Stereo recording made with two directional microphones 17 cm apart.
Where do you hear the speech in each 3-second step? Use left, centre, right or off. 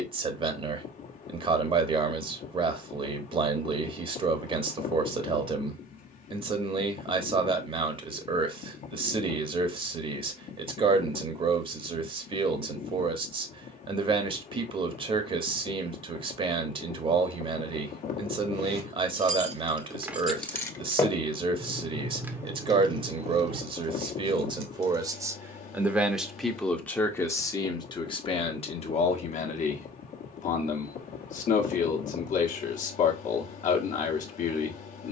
right, right, right, right, right, right, right, right, centre, left, left, left.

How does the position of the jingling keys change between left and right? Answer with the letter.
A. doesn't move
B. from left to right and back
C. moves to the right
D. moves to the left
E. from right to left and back
E.